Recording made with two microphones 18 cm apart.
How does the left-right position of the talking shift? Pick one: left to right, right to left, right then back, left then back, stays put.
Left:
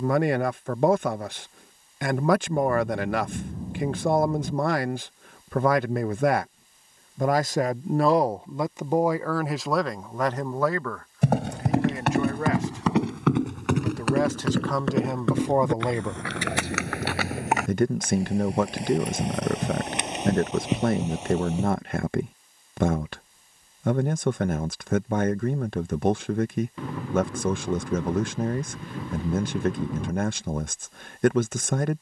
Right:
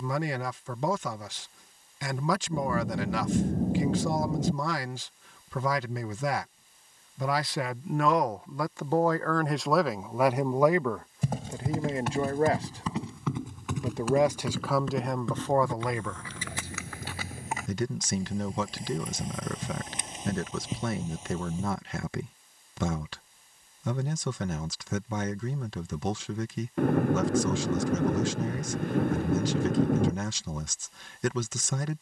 right then back.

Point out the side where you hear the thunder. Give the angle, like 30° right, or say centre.
60° right.